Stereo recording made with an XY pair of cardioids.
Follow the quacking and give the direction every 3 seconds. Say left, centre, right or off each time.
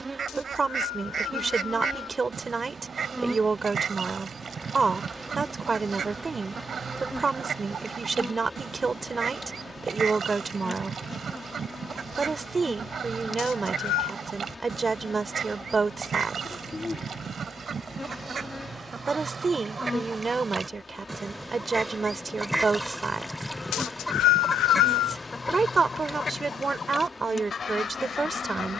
right, right, right, right, right, right, right, centre, left, left.